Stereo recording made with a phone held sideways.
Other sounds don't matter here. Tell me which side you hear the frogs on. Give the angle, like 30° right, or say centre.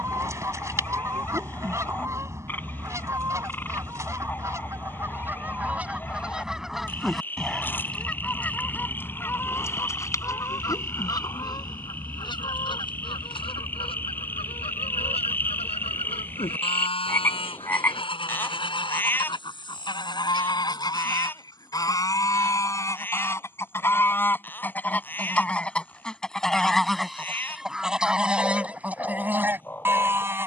10° left.